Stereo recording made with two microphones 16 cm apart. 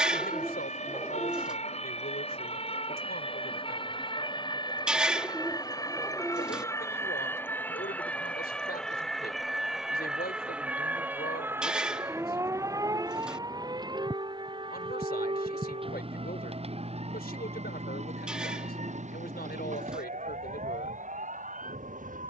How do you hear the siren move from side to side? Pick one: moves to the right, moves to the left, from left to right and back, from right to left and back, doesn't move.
moves to the right.